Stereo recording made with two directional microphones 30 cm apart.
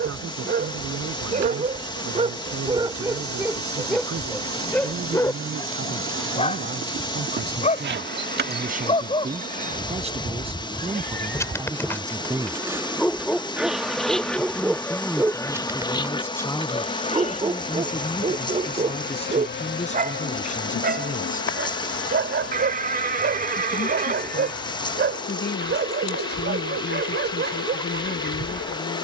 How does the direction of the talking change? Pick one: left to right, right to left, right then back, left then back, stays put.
right to left.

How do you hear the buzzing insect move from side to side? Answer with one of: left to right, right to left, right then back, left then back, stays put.
right to left.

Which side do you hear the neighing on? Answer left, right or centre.
right.